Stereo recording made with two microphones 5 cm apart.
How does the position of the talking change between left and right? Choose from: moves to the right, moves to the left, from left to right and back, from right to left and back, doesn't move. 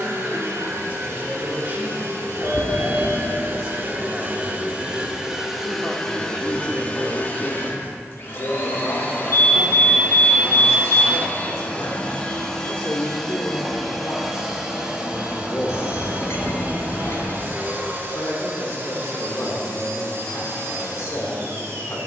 moves to the left.